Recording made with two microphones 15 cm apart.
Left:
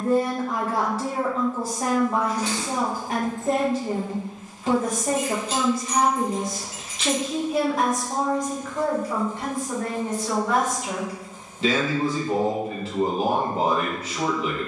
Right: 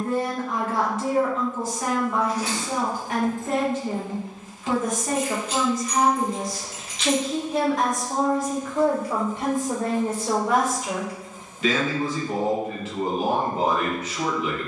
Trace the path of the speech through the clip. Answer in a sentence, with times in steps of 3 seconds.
In this clip you hear the speech on the left from 0 s, in the centre from 6 s and on the left from 12 s.